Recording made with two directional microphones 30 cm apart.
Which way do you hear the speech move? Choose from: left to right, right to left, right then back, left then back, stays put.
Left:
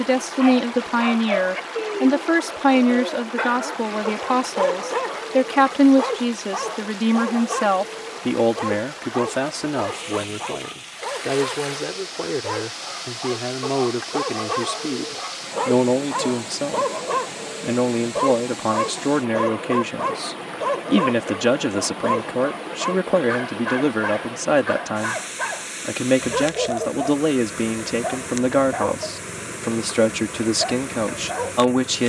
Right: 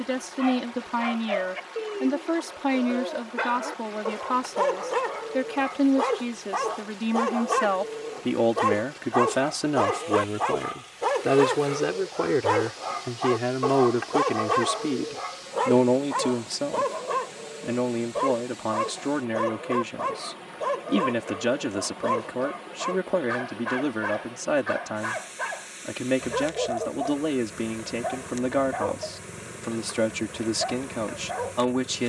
right then back.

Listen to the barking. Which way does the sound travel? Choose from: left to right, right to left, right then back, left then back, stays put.
right then back.